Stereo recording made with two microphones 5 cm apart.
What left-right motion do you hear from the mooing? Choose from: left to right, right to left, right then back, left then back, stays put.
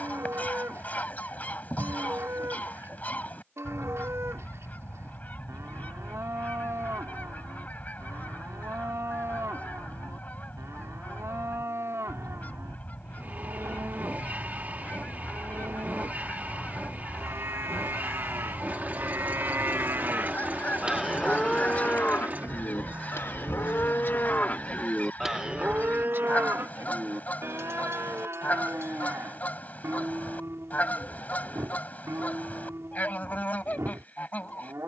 left then back.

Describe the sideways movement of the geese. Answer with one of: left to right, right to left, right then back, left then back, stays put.
stays put.